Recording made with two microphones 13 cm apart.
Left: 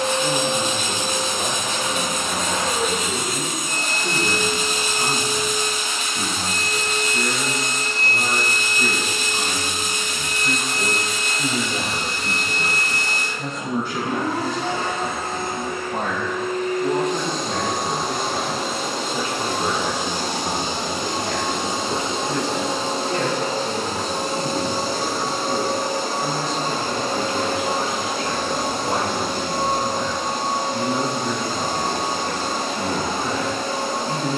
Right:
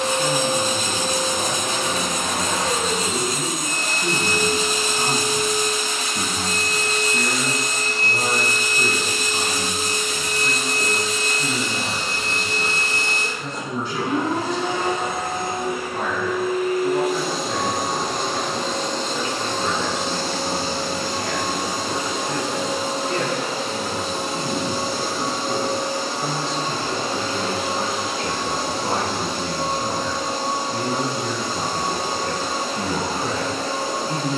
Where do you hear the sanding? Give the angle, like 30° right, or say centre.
40° right.